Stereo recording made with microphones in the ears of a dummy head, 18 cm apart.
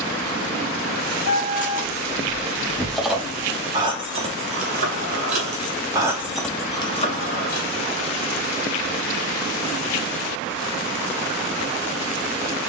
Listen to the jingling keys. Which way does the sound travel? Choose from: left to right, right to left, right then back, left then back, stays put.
right then back.